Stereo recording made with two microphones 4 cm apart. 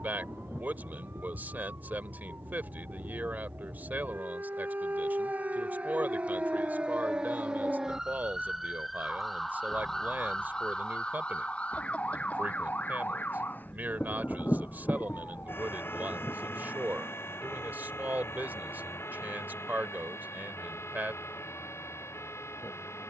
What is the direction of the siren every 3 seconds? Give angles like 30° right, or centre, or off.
50° right, 40° right, 20° right, 20° left, 40° left, 60° left, 70° left, 70° left.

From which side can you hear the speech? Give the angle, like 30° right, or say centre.
40° right.